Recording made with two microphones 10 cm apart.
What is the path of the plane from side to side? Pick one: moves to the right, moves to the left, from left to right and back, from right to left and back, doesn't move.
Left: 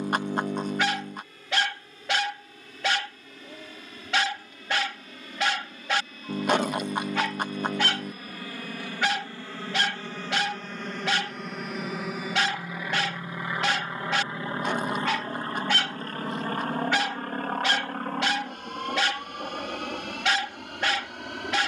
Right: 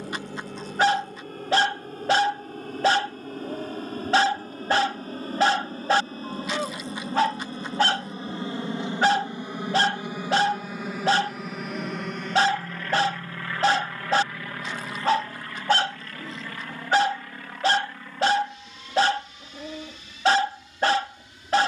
moves to the left.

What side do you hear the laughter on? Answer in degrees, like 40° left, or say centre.
50° left.